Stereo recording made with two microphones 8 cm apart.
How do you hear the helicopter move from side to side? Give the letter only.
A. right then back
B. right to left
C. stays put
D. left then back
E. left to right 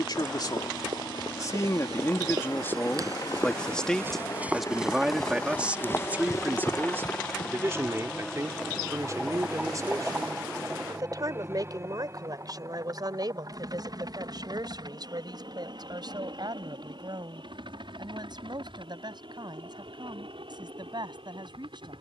E.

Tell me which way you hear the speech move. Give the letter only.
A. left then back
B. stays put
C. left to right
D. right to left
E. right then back
C.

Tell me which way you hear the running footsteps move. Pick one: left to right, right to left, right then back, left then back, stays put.
right to left.